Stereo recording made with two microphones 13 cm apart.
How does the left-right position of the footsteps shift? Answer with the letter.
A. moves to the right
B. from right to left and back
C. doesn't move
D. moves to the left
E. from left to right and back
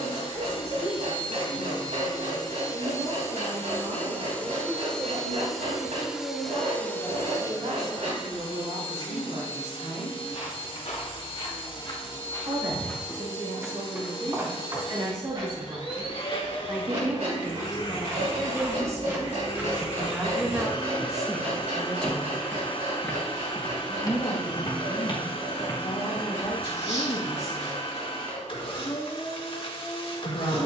E.